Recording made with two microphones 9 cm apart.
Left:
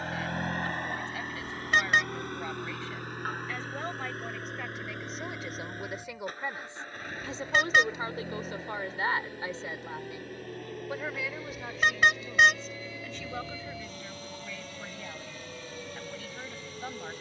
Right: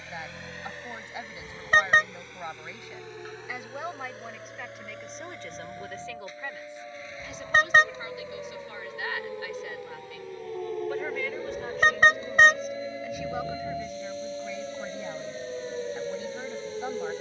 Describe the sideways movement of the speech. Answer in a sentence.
In this clip you hear the speech move from right to left and back again.